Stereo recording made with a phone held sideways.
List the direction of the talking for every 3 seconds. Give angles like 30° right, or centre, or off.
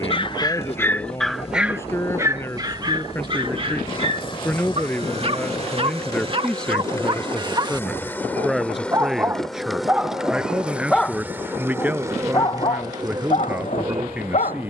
20° left, 10° left, centre, 10° right, 10° right.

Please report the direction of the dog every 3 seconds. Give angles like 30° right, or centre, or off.
centre, 40° right, 30° right, centre, 40° left.